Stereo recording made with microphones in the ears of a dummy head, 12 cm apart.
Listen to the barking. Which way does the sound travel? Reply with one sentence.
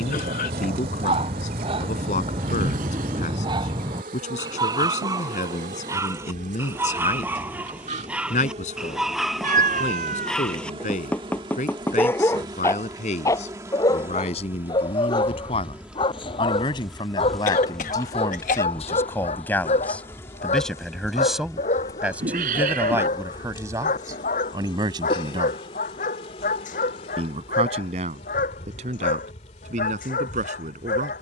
In this clip you hear the barking move to the left.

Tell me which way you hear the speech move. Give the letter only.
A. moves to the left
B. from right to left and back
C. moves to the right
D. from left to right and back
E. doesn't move
C.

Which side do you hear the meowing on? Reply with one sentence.
In this clip you hear the meowing on the right.